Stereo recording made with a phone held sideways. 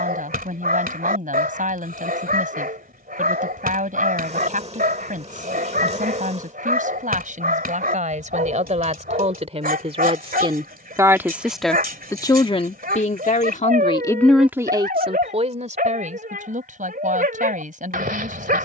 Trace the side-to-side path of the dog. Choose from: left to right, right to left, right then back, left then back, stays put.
stays put.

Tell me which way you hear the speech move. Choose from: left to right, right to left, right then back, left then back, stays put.
left then back.